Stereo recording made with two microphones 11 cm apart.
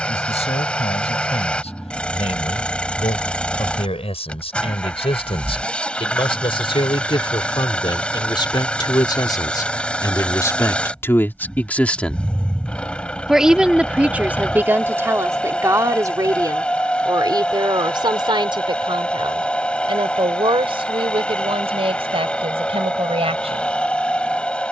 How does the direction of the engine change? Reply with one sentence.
You can hear the engine stay put.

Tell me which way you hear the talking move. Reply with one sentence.
You can hear the talking go from the left side to the right.